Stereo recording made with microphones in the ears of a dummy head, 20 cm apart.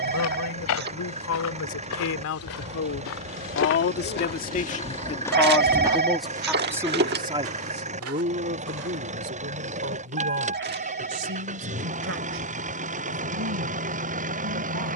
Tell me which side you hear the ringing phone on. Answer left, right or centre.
right.